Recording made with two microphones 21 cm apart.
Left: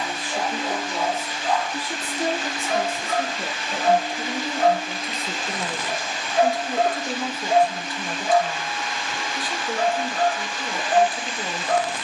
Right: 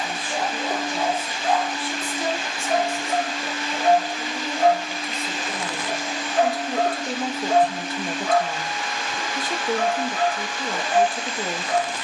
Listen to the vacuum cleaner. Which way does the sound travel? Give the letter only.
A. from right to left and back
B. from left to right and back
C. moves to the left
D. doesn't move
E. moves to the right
A.